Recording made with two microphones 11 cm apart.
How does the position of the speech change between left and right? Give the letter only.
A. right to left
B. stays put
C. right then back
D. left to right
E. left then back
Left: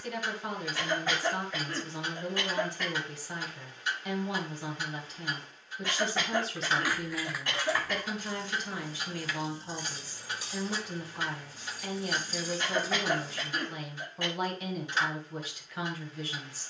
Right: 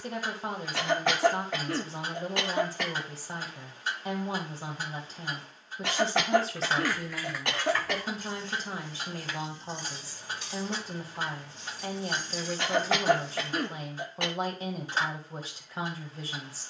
B.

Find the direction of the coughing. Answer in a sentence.
You can hear the coughing on the right.